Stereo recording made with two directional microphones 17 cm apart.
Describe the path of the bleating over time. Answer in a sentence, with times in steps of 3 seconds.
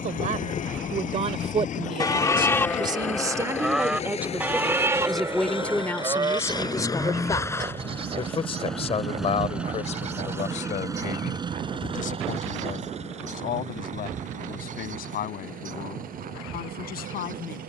You can hear the bleating on the left from 0 s, in the centre from 3 s and on the right from 6 s.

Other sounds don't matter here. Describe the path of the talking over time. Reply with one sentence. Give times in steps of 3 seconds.
You can hear the talking on the right from 0 s, in the centre from 3 s and on the left from 6 s.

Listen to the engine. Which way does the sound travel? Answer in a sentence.
You can hear the engine move to the right.